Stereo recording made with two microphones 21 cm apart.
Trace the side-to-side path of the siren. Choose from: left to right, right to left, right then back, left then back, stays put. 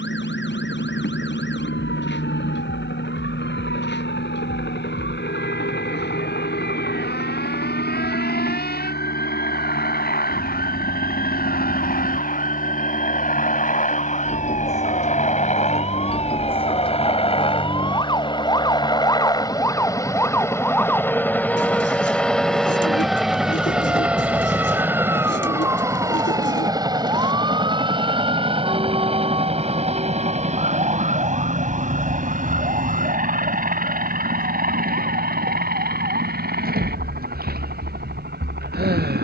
left to right.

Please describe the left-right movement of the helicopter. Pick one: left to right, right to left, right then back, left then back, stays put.
left to right.